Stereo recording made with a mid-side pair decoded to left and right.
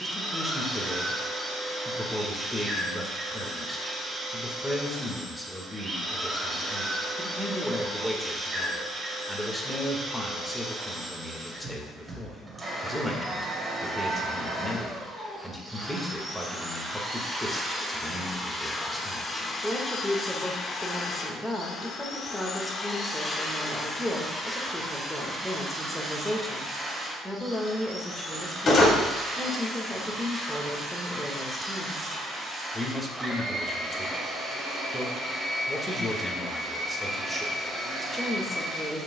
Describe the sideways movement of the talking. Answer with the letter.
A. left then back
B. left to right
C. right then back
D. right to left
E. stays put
E.